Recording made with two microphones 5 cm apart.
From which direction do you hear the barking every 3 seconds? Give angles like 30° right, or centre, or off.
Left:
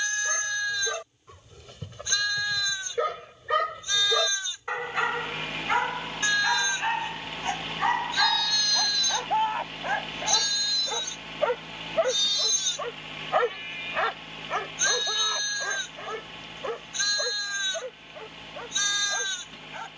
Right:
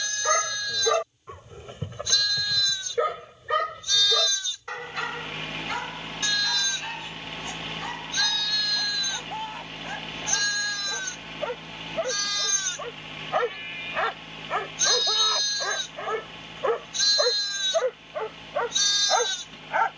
30° right, 10° left, 40° left, 30° left, centre, 30° right, 50° right.